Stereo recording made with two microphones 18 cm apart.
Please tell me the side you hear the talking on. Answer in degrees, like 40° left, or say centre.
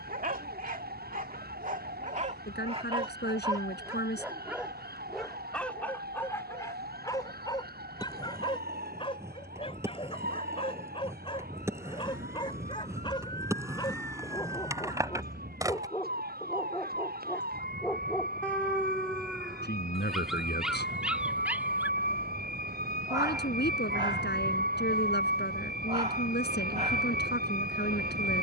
70° left.